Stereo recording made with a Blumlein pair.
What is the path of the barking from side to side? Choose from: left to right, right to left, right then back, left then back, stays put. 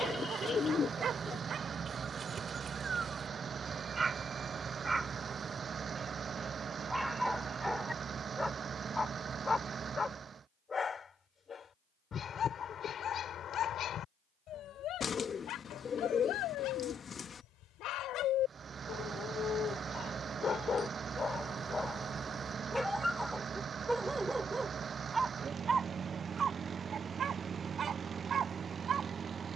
left then back.